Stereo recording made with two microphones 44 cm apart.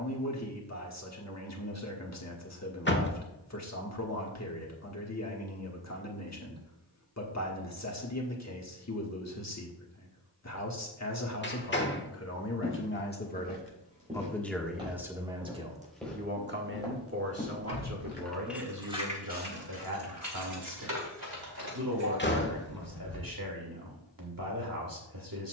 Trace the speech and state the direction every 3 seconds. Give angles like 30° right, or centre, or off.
40° left, 40° left, 40° left, 40° left, 20° left, 20° right, 50° right, 50° right, 50° right.